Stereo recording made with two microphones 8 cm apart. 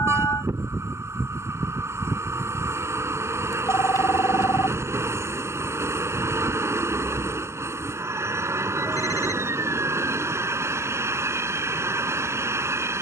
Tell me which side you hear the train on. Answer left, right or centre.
right.